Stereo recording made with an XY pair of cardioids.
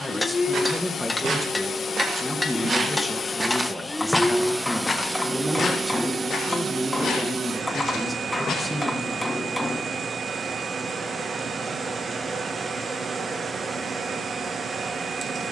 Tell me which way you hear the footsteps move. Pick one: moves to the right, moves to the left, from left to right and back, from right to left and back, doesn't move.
moves to the left.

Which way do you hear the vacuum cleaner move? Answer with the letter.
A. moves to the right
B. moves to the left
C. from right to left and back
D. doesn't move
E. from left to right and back
A.